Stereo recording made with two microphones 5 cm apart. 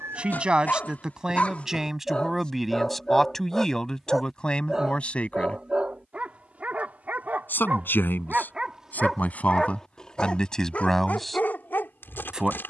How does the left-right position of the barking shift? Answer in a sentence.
You can hear the barking move from left to right and back again.